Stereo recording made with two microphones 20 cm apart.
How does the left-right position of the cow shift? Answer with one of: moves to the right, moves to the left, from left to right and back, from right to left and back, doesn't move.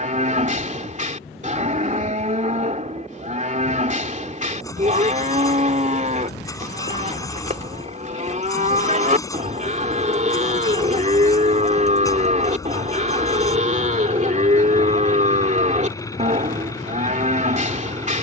doesn't move.